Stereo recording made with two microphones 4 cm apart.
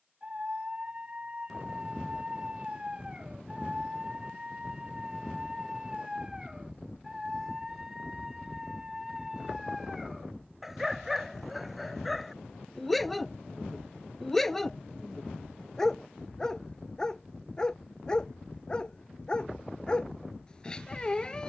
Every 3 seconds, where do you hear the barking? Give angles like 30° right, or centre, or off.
20° right, 20° right, 10° right, centre, centre, 10° left, 20° left.